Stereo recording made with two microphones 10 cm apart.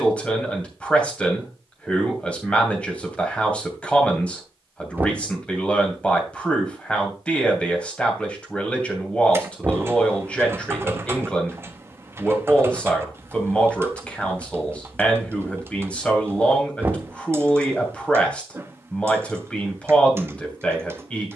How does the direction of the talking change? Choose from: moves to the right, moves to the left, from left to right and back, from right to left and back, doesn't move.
doesn't move.